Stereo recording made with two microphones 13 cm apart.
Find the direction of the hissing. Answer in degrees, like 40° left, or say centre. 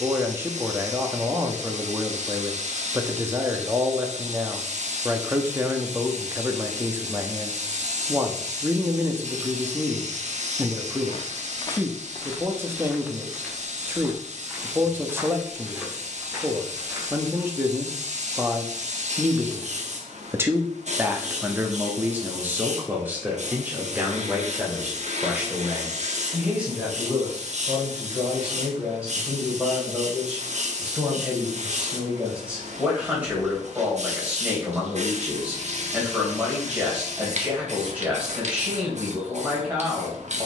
60° right.